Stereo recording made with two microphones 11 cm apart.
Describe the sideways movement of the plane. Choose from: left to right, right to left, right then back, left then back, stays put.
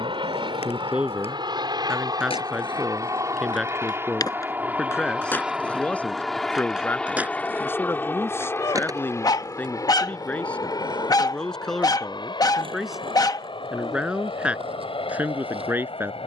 right to left.